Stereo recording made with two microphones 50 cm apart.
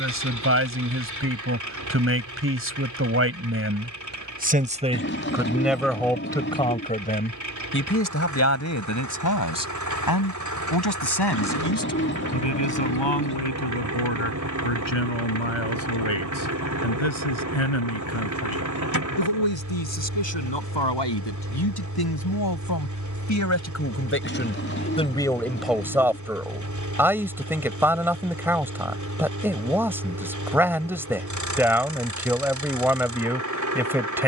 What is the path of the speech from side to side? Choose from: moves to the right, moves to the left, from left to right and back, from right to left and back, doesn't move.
from right to left and back.